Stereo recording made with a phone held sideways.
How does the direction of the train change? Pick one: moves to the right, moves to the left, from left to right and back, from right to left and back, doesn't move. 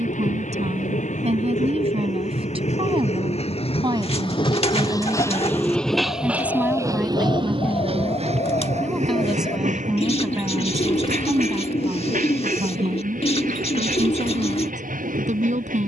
moves to the right.